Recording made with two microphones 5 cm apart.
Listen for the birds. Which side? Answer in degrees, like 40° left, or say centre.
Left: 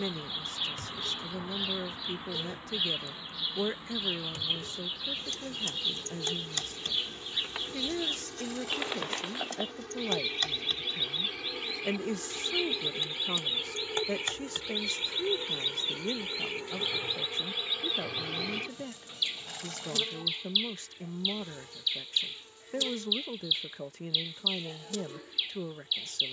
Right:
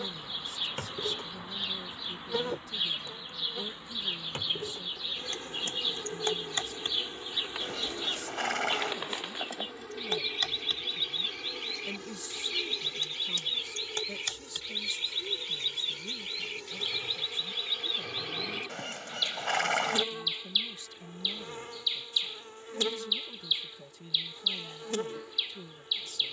centre.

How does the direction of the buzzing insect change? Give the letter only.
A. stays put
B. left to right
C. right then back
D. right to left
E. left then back
E.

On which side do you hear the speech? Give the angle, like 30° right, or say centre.
50° left.